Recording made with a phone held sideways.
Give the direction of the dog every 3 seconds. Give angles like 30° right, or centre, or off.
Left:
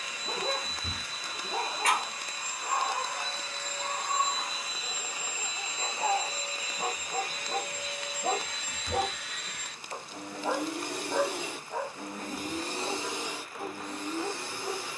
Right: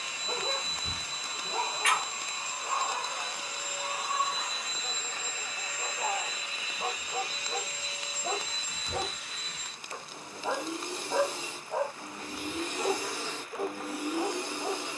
50° left, 50° left, 50° left, 10° left, 50° right.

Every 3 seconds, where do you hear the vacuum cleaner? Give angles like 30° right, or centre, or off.
30° right, centre, 50° left, 70° left, 10° left.